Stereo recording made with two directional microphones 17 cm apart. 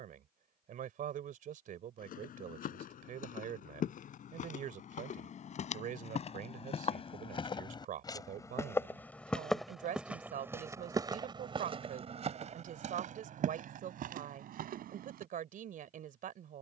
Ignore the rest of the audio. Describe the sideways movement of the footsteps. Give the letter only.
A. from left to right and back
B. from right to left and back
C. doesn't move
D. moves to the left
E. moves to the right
E.